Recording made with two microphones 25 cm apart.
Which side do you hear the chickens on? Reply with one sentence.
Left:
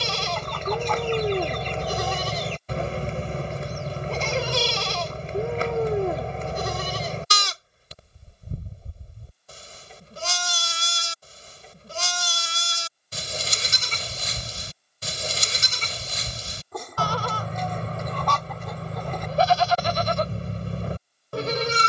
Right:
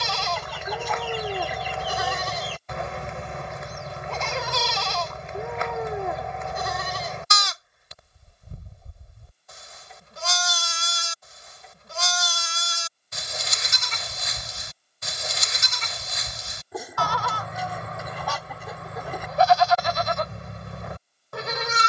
In this clip you hear the chickens in the centre.